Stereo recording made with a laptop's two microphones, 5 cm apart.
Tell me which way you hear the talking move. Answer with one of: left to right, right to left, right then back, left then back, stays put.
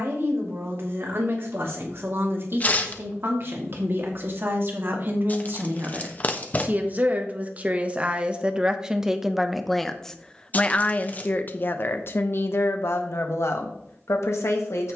right to left.